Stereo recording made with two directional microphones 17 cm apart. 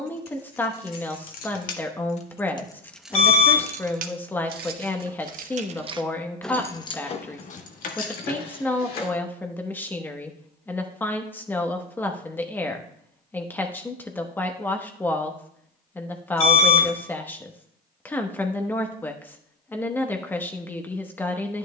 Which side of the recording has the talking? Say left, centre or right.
centre.